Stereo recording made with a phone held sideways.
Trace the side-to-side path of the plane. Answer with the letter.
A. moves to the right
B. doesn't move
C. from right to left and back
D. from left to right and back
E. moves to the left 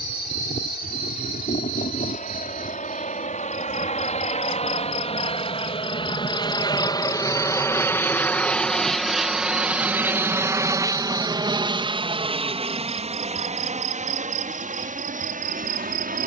A.